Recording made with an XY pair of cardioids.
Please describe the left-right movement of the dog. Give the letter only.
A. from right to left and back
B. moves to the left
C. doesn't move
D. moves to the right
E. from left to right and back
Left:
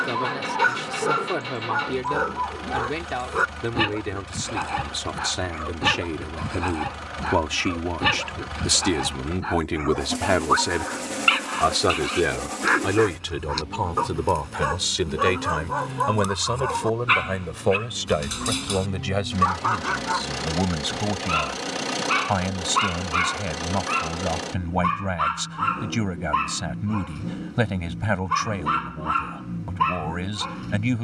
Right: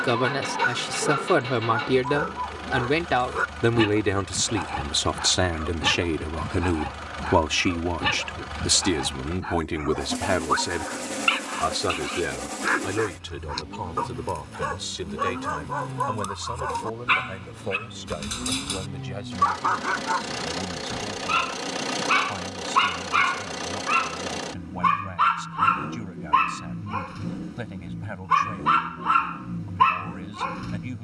D.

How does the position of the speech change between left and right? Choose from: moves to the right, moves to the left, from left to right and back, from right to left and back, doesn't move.
moves to the left.